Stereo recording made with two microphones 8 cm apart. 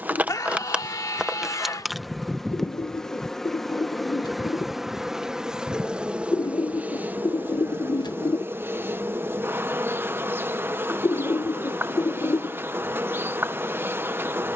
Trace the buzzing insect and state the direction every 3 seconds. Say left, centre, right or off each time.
centre, centre, right, right, right.